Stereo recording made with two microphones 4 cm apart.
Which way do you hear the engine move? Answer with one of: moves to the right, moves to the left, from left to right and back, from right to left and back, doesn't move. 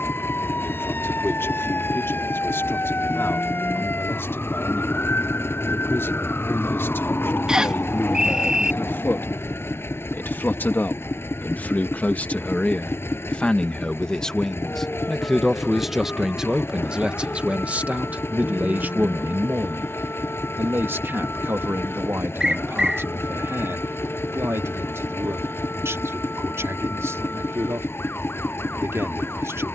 doesn't move.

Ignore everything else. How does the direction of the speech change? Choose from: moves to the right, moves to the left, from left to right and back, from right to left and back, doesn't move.
moves to the right.